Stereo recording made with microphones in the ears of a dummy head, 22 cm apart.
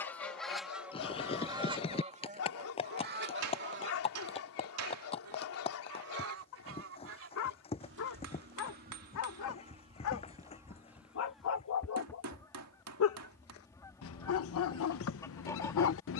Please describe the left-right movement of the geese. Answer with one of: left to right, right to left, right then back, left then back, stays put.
right then back.